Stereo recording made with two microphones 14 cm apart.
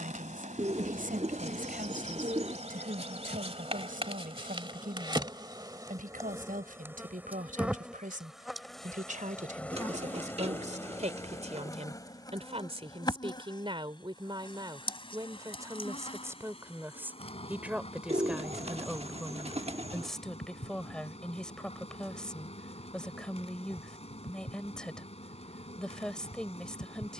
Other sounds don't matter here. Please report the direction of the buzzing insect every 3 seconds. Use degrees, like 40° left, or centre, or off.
60° right, 40° right, 10° right, 20° left, 30° left, 40° left, 50° left, 50° left, 50° left.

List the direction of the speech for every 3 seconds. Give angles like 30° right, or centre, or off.
80° right, 80° right, 70° right, 60° right, 40° right, 20° right, centre, 10° left, 10° left.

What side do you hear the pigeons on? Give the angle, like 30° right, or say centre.
50° right.